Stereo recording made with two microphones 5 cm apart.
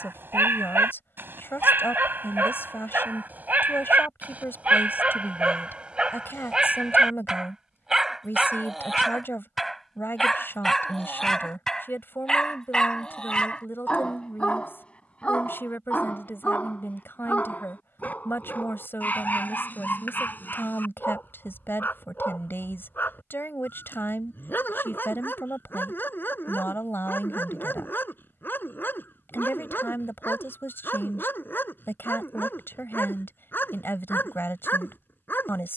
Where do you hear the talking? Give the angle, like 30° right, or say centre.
50° left.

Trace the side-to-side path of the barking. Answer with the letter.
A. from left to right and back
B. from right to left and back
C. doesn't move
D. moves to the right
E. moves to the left
E.